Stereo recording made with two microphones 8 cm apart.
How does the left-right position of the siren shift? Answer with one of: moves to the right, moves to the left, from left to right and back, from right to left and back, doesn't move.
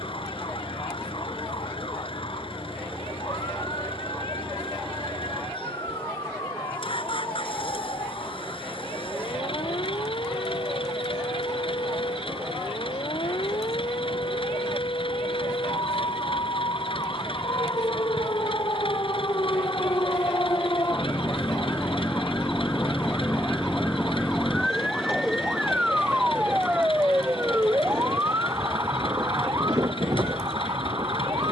moves to the right.